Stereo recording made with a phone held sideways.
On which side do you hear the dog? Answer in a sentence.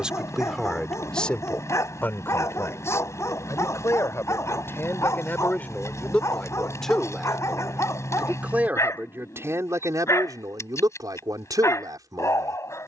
In this clip you hear the dog on the left.